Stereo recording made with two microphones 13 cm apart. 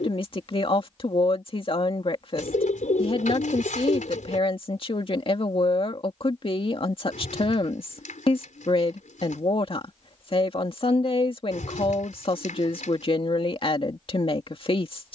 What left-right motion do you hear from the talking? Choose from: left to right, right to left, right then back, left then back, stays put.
stays put.